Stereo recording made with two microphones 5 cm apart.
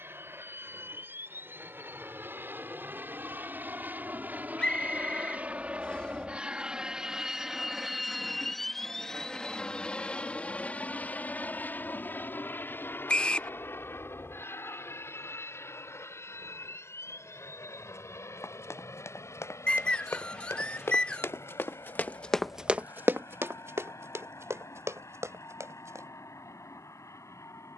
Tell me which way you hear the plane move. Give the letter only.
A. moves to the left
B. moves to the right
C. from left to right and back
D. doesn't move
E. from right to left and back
A.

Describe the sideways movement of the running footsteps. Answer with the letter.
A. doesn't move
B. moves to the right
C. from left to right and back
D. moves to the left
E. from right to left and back
B.